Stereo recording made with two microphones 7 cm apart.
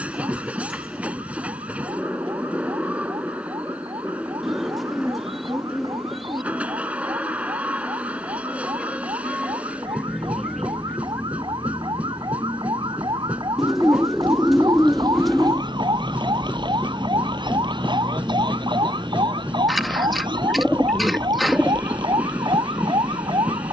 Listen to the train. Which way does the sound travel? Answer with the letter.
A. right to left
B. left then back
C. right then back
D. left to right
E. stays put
E.